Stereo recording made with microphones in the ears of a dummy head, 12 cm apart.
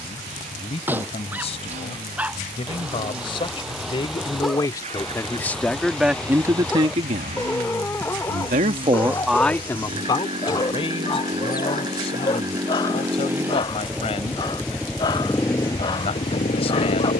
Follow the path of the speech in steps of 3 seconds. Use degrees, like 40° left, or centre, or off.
50° left, 30° left, 40° right, 30° left, 50° left, 50° left.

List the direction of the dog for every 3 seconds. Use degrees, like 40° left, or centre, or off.
10° right, centre, 10° left, 20° left, 30° left, 30° left.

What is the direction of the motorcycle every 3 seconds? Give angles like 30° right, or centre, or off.
50° right, 50° right, 40° right, 30° right, 10° right, 30° left.